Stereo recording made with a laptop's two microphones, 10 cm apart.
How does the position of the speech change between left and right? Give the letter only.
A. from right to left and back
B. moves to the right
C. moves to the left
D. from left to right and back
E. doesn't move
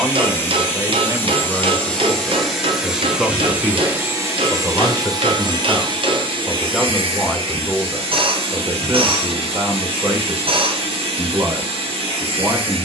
A.